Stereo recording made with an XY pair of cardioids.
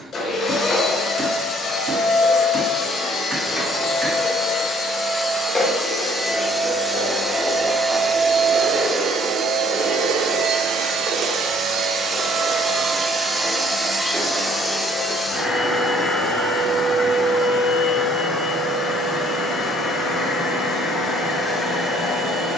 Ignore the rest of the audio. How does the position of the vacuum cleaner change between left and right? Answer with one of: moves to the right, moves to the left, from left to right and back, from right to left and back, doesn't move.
from left to right and back.